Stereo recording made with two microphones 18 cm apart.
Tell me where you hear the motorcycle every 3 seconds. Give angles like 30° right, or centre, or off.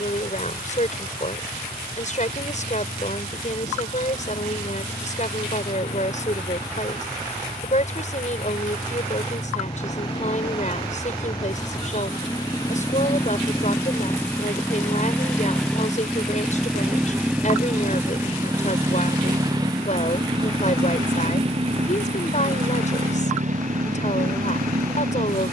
50° left, 40° left, 40° left, 30° left, 20° left, centre, 20° right, 40° right, 50° right.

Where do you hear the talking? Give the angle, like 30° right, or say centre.
50° left.